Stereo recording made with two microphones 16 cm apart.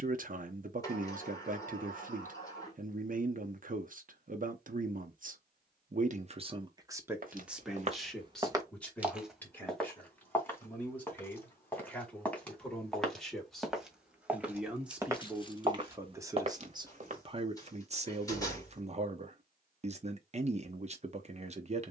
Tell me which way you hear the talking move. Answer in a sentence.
In this clip you hear the talking go left and come back.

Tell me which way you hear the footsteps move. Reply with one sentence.
You can hear the footsteps move from right to left and back again.